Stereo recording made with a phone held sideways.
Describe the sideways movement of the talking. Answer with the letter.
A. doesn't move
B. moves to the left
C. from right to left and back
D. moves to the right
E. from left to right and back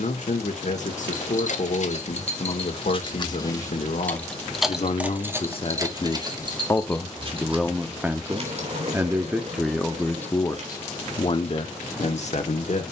E.